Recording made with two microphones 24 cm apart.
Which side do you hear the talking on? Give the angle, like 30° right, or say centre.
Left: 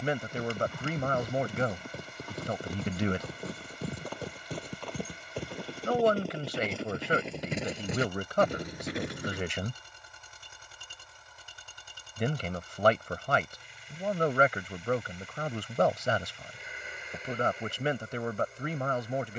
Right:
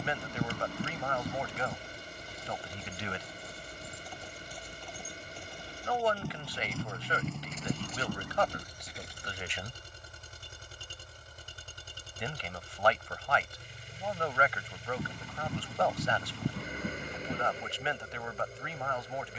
50° left.